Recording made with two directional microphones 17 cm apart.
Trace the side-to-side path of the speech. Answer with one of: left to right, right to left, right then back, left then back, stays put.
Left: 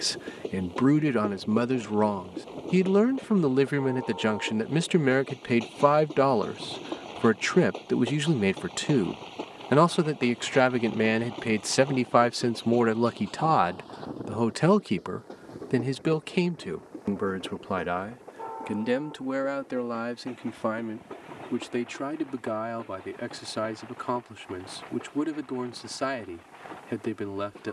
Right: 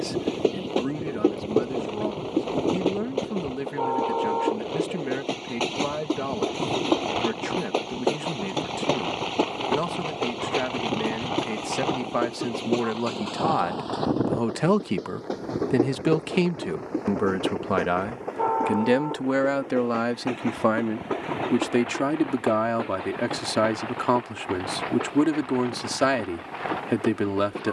left to right.